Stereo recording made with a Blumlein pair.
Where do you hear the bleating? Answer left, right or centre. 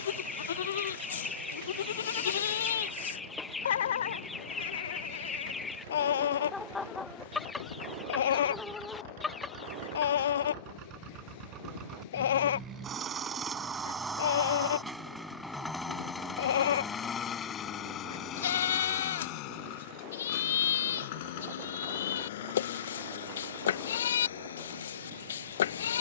left.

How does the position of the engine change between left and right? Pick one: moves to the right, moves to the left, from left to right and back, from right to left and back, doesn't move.
moves to the left.